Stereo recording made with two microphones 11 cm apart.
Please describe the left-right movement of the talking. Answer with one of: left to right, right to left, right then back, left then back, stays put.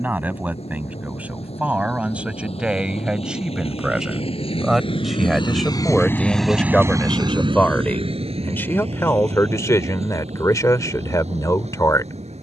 right to left.